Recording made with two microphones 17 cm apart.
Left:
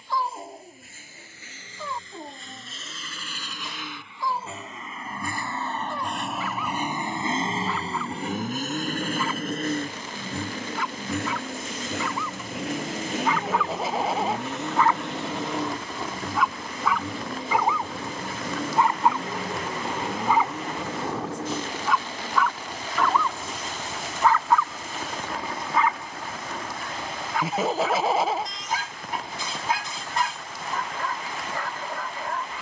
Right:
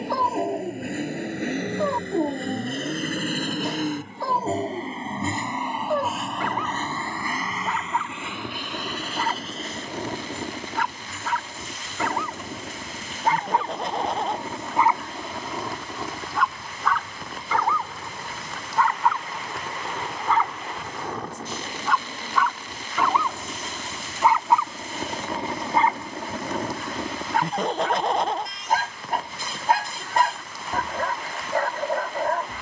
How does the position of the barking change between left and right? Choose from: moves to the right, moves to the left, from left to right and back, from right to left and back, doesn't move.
from right to left and back.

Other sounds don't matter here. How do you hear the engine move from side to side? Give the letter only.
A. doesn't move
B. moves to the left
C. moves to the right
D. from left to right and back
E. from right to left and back
B.